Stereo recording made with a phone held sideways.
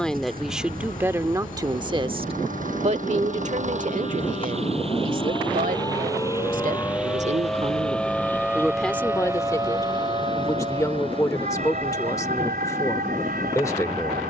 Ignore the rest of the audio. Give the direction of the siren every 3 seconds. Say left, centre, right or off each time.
left, left, centre, right, right.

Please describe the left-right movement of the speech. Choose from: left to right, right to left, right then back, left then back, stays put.
right then back.